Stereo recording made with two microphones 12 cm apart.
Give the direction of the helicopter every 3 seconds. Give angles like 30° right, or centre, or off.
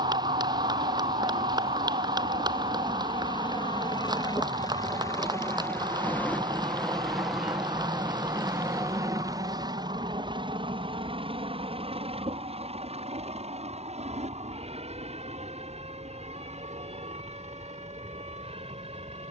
50° left, 30° left, centre, 40° right, 60° right, 70° right, 70° right.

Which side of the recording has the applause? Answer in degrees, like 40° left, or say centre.
40° right.